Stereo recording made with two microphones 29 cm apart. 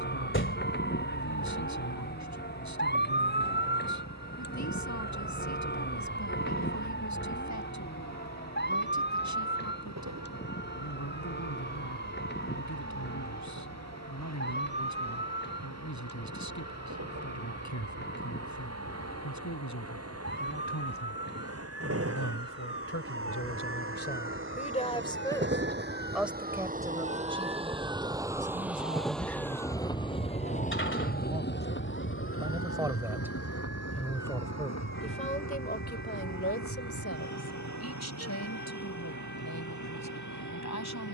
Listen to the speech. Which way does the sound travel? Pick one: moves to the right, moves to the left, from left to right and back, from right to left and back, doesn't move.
from left to right and back.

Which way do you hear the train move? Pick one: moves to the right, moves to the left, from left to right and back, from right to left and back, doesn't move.
moves to the left.